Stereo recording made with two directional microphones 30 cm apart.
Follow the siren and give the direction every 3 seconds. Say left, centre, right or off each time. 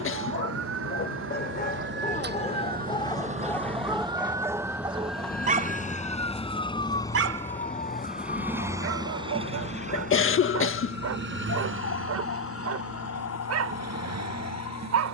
right, centre, left, left, left.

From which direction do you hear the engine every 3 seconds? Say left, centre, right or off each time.
left, left, centre, right, right.